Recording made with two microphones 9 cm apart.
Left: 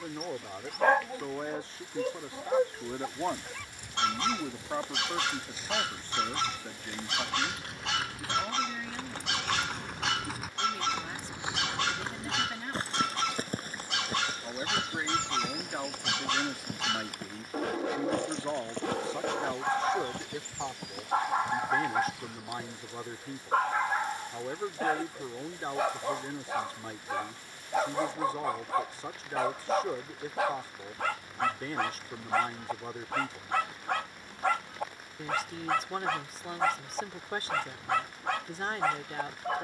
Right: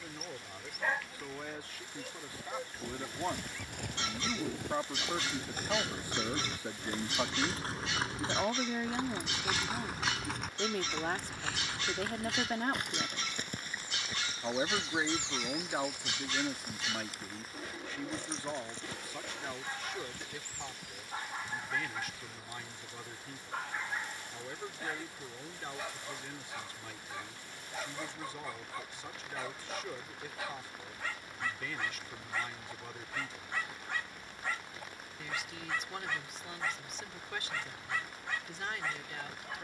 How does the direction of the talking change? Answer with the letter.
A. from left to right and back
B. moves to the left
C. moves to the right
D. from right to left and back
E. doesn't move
A.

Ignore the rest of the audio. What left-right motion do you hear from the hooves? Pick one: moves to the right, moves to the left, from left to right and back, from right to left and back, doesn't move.
moves to the left.